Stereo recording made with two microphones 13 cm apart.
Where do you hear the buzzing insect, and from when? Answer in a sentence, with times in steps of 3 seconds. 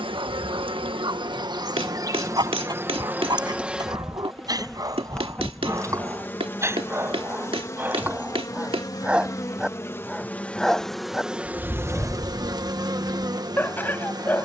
You can hear the buzzing insect on the right from 0 s, in the centre from 3 s, on the left from 6 s, in the centre from 9 s and on the right from 12 s.